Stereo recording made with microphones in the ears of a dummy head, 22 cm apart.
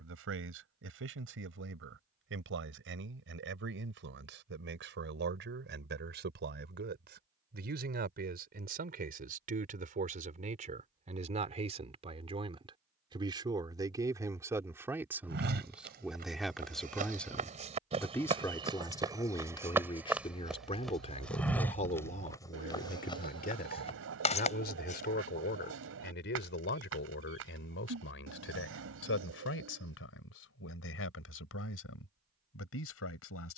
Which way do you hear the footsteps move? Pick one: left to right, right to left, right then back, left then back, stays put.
right to left.